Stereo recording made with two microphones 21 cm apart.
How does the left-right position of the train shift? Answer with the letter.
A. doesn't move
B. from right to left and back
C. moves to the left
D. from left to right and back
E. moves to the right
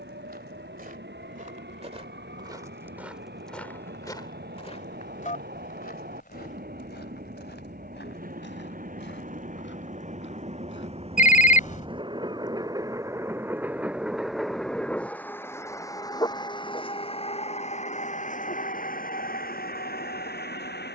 C.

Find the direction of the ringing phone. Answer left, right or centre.
left.